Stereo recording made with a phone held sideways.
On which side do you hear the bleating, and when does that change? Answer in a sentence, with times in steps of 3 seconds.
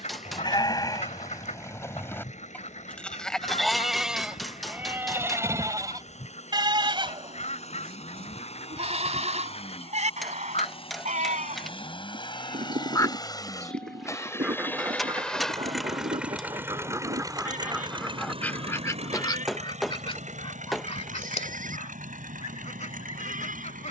In this clip you hear the bleating on the left from 0 s, in the centre from 3 s and on the right from 6 s.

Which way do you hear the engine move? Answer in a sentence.
You can hear the engine travel towards the right.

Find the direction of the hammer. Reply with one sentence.
You can hear the hammer in the centre.